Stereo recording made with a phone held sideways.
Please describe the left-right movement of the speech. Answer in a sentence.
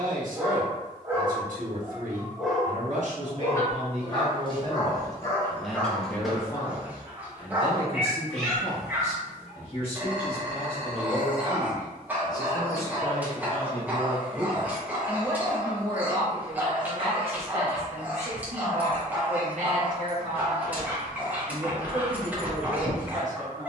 In this clip you hear the speech move from right to left and back again.